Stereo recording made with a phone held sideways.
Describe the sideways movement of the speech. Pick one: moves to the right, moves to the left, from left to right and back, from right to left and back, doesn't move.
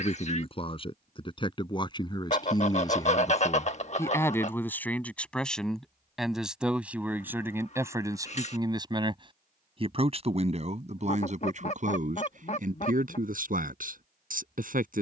moves to the right.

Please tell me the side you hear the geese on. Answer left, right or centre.
left.